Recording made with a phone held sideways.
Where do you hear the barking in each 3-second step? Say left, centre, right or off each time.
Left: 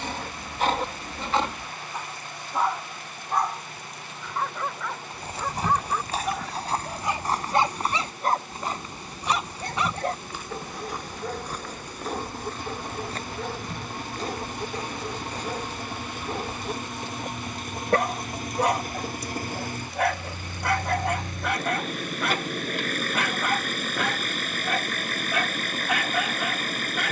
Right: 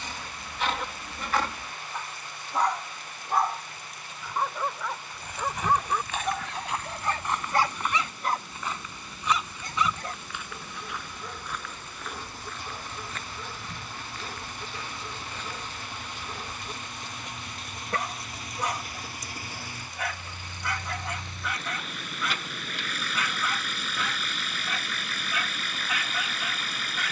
left, centre, left, left, left, left, left, left, left.